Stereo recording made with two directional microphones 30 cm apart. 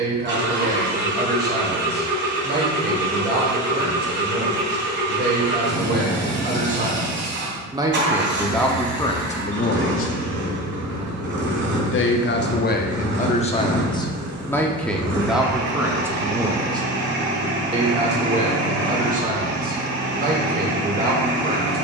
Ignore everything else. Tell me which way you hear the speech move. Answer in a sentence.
You can hear the speech go left and come back.